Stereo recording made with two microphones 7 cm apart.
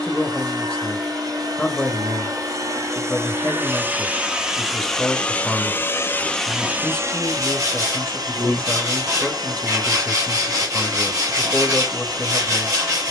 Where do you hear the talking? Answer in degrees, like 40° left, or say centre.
10° left.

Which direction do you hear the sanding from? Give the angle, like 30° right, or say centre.
50° right.